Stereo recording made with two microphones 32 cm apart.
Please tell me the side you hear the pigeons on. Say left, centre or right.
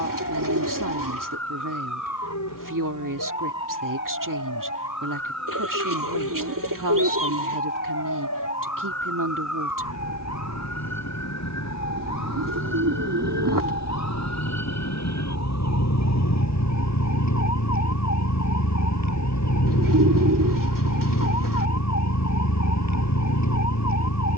right.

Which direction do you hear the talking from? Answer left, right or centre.
right.